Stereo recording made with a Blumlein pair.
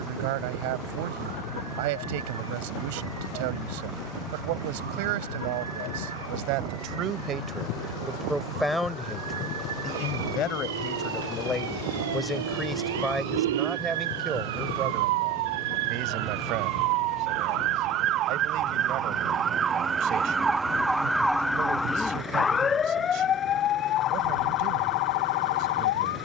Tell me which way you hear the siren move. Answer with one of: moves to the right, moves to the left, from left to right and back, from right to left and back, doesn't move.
moves to the left.